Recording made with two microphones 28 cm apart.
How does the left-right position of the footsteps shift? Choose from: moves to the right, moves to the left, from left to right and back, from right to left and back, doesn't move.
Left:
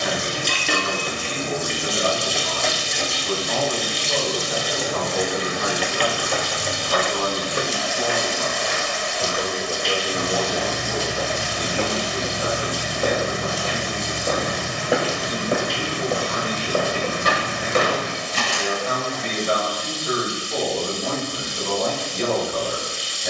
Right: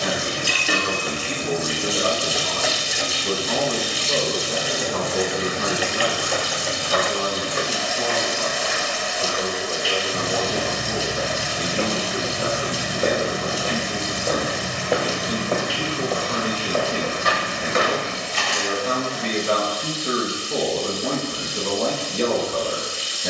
from left to right and back.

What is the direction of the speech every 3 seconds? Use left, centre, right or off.
right, right, centre, centre, right, right, right, right.